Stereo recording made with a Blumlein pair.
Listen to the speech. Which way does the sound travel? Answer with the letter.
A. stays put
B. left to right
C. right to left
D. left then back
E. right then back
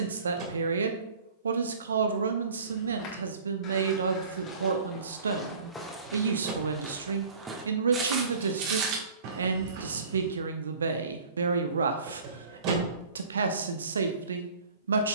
A.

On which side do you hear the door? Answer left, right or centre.
right.